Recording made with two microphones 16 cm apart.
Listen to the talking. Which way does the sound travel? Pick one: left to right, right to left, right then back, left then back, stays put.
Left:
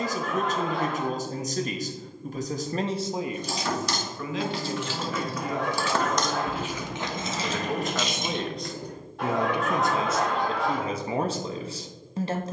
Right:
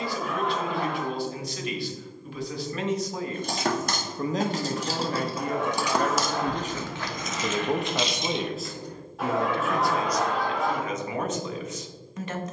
right then back.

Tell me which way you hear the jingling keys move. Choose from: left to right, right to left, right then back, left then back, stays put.
right to left.